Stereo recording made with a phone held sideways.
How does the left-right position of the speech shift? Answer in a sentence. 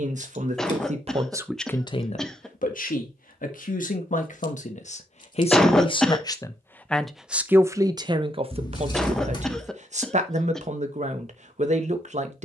In this clip you hear the speech move from right to left and back again.